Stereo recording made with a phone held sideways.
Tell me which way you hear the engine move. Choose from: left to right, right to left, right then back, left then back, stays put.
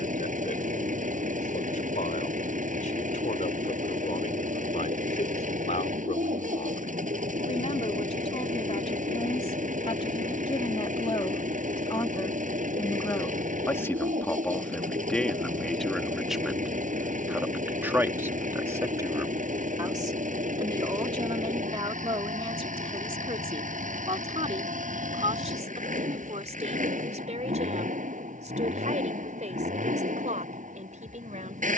stays put.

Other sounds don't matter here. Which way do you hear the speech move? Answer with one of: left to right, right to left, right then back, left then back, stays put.
left to right.